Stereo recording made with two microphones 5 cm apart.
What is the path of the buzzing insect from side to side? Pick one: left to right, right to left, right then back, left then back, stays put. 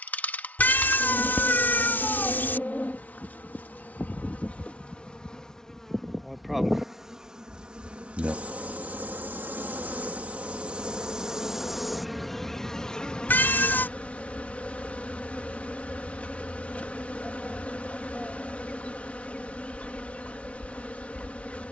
right then back.